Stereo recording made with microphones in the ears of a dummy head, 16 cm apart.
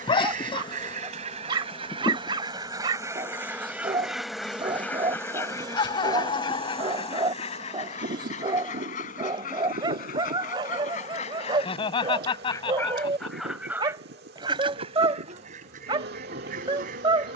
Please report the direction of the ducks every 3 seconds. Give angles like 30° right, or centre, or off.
30° right, centre, 40° left, 50° left, centre, 50° right.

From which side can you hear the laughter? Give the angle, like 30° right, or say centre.
30° left.